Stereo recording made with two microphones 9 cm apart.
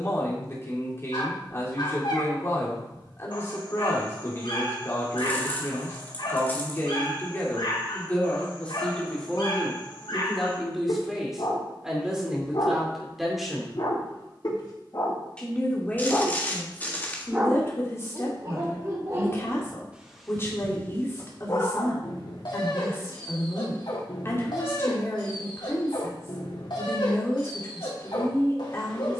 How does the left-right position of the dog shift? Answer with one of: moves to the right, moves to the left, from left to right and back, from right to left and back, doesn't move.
from left to right and back.